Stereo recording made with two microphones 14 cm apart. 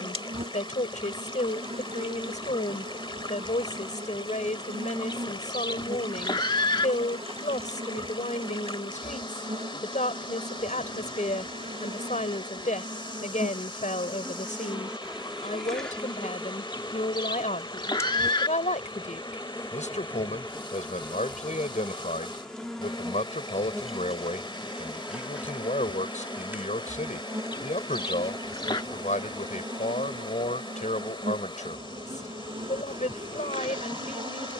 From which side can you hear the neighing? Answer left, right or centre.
left.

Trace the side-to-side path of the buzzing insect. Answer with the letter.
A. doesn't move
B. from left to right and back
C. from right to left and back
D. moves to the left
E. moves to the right
C.